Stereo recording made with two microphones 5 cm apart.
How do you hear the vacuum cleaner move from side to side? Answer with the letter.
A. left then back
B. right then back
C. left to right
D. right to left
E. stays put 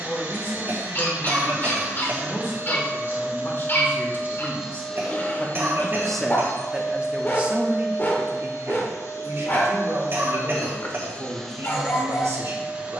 A.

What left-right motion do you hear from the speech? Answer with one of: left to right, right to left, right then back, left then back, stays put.
left to right.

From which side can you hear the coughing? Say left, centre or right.
right.